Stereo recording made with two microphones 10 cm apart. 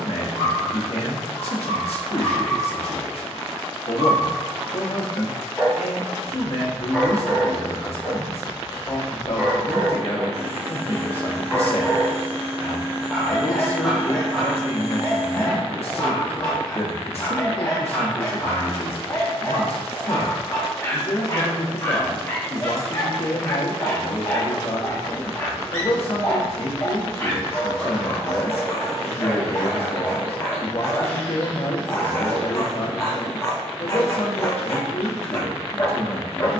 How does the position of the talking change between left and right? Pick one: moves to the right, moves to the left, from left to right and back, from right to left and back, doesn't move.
doesn't move.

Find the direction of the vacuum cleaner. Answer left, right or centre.
right.